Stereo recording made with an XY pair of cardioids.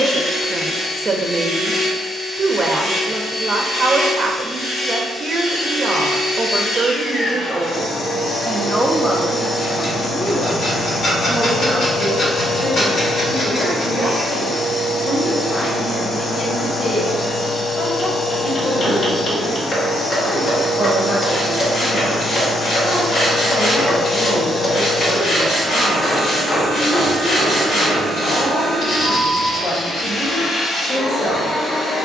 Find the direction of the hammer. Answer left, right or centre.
left.